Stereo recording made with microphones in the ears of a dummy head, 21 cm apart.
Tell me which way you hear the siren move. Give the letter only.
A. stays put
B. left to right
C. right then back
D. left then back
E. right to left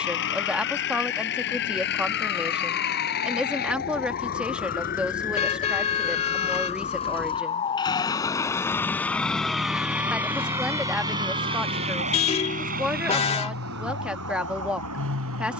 B.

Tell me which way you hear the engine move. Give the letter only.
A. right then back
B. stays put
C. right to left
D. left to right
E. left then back
D.